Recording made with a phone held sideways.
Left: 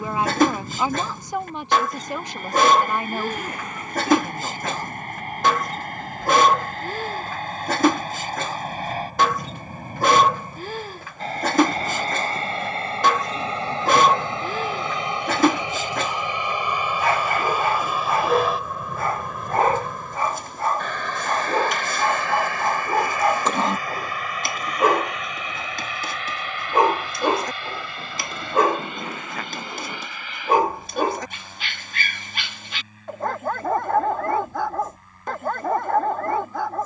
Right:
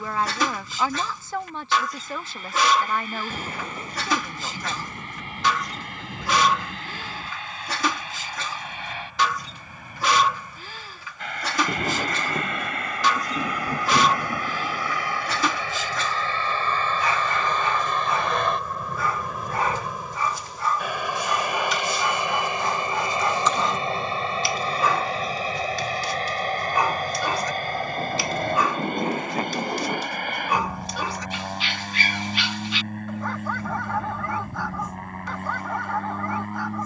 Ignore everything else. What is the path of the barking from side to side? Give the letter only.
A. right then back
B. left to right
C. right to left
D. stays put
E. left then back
D.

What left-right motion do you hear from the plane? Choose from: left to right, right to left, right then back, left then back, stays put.
left to right.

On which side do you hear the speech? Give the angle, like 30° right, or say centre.
20° left.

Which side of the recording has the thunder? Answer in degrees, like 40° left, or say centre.
30° right.